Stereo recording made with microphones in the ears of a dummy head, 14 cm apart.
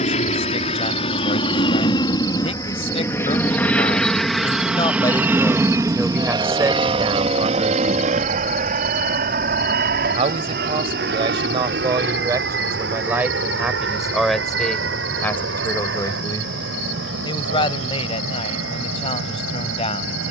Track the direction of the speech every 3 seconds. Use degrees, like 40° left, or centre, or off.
40° left, 30° left, 30° right, 40° right, 10° right, 20° left, 40° left.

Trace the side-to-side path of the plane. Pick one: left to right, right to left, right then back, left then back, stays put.
left to right.